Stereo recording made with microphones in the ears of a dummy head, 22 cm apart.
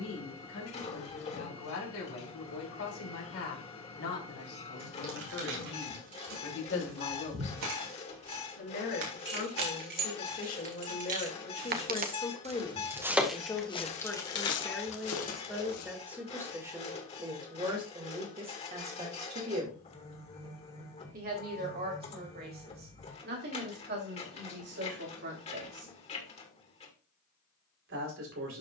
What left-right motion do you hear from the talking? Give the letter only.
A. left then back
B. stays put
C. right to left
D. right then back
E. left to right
E.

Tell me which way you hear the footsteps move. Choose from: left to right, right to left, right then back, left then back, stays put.
right to left.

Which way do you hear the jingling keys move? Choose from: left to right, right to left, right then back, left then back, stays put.
right to left.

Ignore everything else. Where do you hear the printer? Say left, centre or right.
left.